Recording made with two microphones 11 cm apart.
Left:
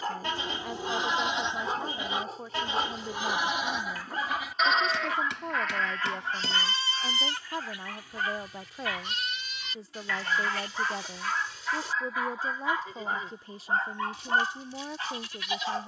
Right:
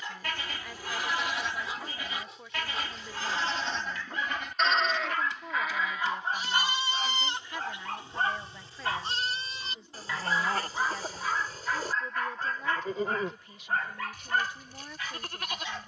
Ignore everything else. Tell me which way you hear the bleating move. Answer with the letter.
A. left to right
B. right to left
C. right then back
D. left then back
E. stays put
A.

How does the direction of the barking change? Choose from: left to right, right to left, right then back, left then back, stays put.
right then back.